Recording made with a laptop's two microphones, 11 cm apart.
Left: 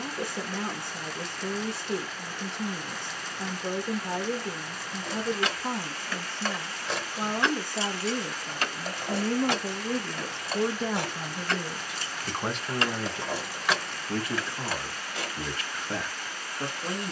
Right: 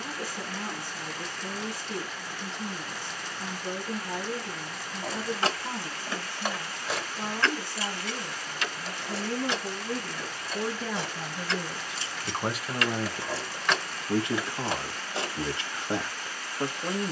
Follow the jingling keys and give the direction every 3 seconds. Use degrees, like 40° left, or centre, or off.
off, 30° right, 10° left, 60° left, 10° left, 30° right.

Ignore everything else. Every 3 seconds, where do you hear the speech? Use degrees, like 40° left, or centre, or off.
60° left, 60° left, 60° left, 30° left, 10° right, 20° right.